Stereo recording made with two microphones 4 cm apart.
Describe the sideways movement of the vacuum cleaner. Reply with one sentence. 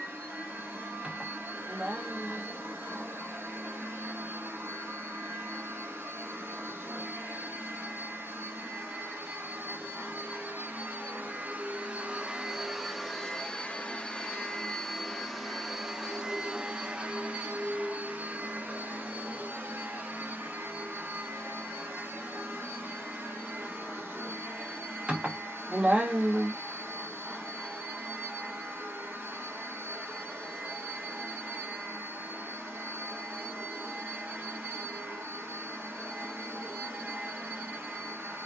You can hear the vacuum cleaner go left and come back.